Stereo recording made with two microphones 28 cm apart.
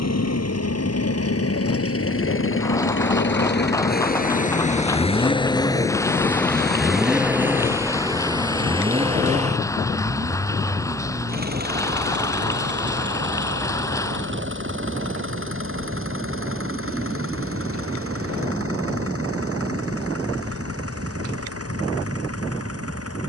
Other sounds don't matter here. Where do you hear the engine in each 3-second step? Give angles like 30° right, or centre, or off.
60° left, 30° left, 10° right, 30° right, 40° right, 50° right, 50° right, 60° right.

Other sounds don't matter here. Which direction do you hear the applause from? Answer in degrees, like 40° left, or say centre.
10° left.